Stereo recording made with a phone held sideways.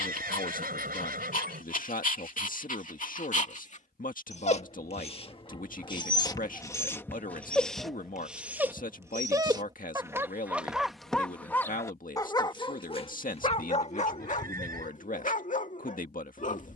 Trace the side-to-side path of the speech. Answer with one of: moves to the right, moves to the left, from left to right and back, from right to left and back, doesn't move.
doesn't move.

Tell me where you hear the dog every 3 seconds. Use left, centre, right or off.
left, left, centre, centre, left, left.